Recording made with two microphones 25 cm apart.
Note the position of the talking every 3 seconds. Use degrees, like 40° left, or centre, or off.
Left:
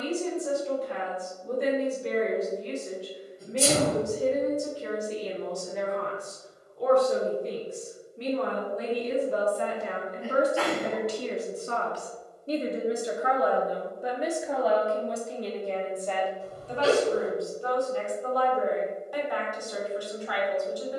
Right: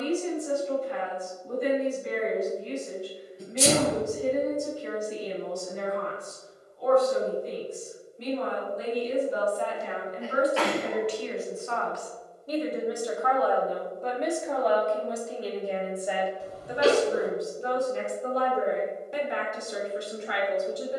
80° left, 80° left, 70° left, 50° left, 10° left, 10° right, 20° right.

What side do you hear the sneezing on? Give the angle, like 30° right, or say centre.
80° right.